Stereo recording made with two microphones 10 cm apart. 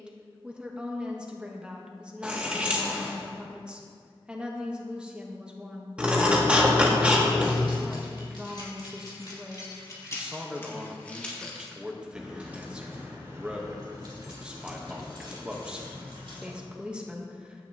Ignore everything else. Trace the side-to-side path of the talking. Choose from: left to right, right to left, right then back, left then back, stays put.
stays put.